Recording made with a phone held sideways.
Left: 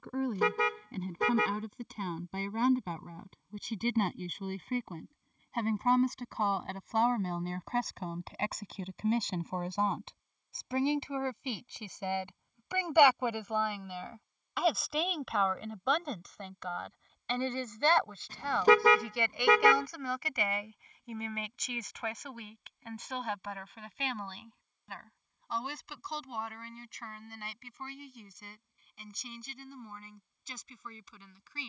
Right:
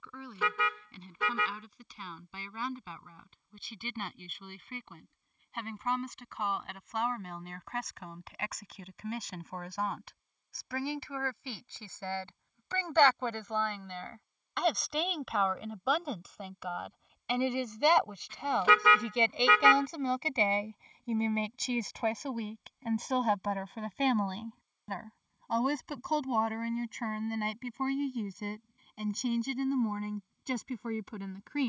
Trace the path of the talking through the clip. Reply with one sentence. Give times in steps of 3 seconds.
You can hear the talking on the left from 0 s, in the centre from 12 s and on the right from 18 s.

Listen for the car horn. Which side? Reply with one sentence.
In this clip you hear the car horn on the left.